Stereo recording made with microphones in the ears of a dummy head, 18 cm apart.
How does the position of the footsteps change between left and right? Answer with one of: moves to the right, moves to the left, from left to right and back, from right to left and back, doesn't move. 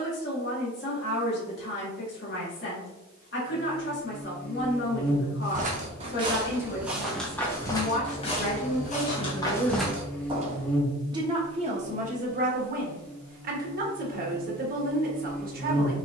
from right to left and back.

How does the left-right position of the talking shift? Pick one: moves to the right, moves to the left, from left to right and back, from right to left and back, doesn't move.
moves to the right.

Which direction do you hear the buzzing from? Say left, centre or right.
centre.